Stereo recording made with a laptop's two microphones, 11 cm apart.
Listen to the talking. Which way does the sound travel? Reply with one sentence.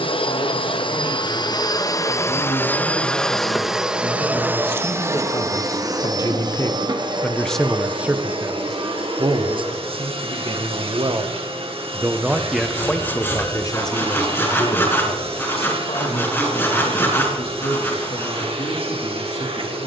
In this clip you hear the talking move from left to right and back again.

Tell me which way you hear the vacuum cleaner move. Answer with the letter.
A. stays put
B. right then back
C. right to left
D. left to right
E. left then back
D.